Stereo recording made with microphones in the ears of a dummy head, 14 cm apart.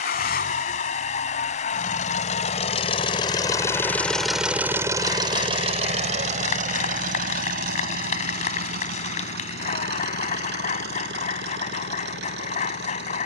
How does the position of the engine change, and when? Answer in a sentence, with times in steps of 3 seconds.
In this clip you hear the engine on the left from 0 s, in the centre from 3 s and on the right from 6 s.